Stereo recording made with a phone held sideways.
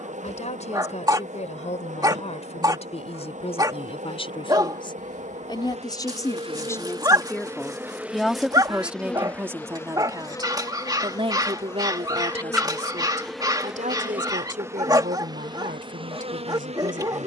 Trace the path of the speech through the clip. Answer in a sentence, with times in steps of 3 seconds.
In this clip you hear the speech on the left from 0 s, in the centre from 6 s and on the right from 9 s.